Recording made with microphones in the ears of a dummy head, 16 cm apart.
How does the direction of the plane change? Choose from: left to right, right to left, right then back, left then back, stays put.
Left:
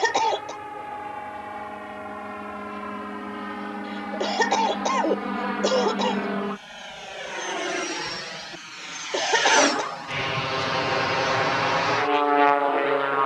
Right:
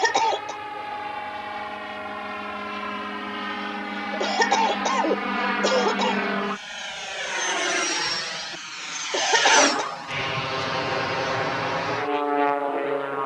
right to left.